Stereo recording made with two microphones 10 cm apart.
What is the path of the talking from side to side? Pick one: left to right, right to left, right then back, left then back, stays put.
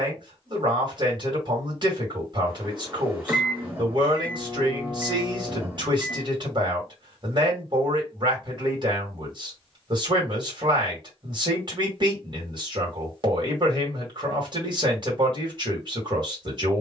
stays put.